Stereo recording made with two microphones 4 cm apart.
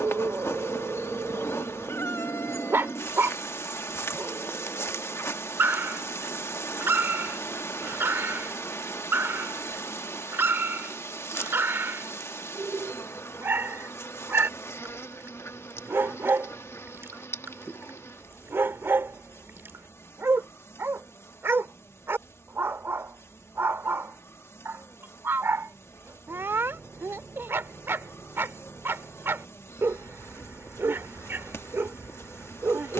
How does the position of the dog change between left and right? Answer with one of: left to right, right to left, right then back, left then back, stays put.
stays put.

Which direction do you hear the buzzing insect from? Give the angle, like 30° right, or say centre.
70° left.